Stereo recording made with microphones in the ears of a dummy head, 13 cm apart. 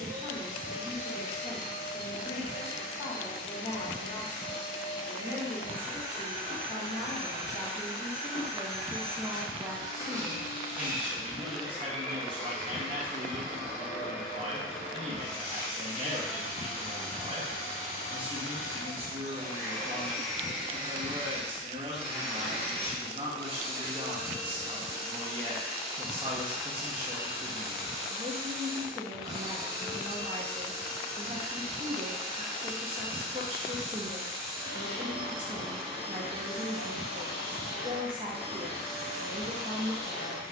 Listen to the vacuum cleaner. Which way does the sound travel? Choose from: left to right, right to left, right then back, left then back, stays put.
left then back.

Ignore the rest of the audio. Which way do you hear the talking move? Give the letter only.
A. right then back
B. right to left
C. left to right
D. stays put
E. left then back
C.